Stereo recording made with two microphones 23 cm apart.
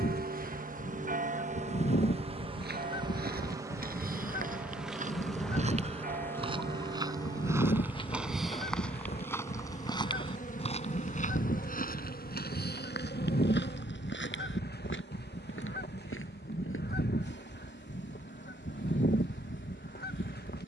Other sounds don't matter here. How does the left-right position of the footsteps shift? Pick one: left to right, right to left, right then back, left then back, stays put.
right to left.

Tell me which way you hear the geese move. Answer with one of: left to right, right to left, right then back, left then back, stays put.
stays put.